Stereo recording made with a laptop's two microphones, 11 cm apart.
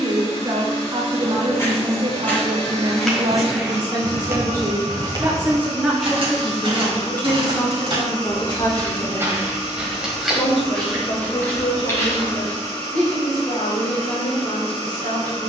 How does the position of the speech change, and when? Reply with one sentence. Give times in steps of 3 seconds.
In this clip you hear the speech on the right from 0 s and on the left from 6 s.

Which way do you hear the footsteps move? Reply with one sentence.
In this clip you hear the footsteps go right and come back.